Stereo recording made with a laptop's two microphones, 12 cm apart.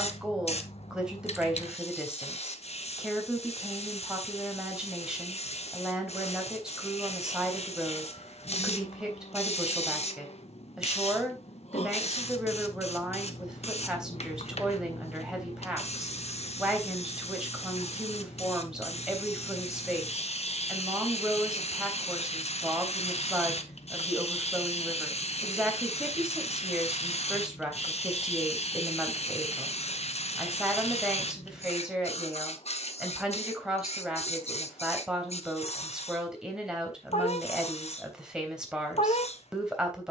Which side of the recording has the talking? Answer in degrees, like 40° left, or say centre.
10° right.